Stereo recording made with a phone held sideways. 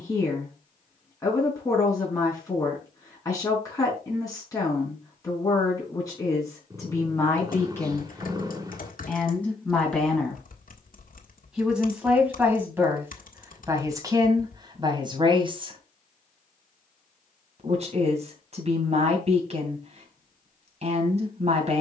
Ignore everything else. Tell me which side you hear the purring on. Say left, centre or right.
right.